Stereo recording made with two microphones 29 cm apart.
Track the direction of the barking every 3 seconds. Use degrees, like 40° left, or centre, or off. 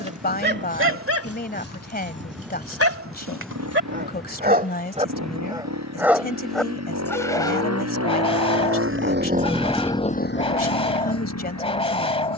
50° right, 40° right, 10° left, 20° left.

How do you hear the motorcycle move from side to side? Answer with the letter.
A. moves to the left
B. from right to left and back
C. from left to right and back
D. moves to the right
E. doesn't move
A.